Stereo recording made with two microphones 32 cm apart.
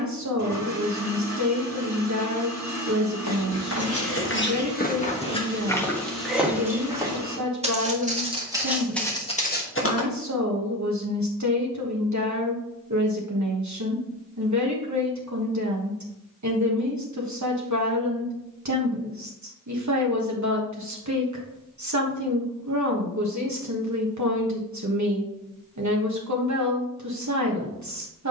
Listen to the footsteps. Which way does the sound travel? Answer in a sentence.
In this clip you hear the footsteps move from left to right and back again.